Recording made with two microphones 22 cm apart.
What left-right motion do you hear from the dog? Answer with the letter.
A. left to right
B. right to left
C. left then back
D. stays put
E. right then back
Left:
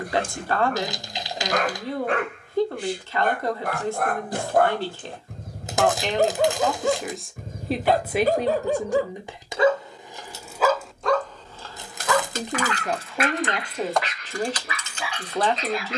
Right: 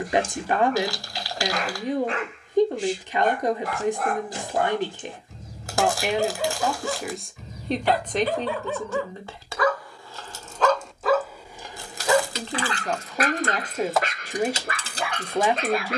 A.